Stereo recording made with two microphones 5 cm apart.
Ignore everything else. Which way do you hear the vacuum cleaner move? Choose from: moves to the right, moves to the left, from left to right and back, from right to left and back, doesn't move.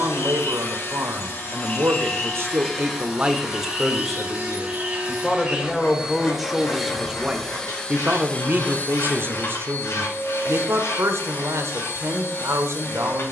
from left to right and back.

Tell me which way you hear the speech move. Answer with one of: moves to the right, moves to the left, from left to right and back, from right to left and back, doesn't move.
from right to left and back.